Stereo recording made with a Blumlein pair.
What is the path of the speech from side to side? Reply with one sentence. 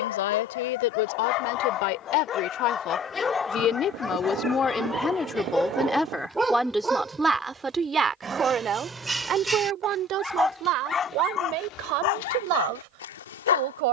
In this clip you hear the speech go from the left side to the right.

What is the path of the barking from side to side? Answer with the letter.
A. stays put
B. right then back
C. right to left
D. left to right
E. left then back
B.